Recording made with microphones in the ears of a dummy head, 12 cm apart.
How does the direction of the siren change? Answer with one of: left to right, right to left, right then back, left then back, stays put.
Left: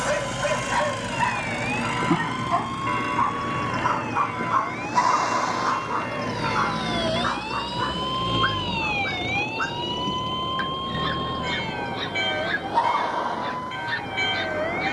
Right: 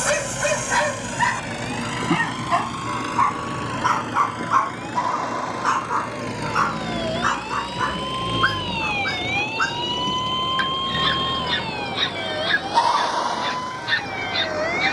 left to right.